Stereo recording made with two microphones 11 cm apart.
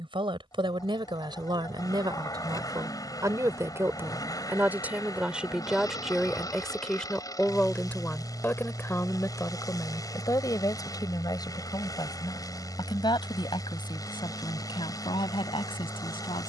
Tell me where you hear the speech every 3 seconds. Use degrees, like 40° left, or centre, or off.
40° right, 20° right, 10° left, 30° left, 50° left, 50° left.